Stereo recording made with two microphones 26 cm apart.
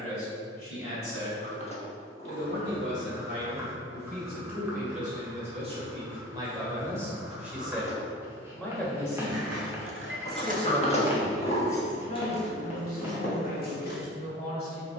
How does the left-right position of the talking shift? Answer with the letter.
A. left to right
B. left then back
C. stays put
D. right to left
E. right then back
D.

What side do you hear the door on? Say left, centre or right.
left.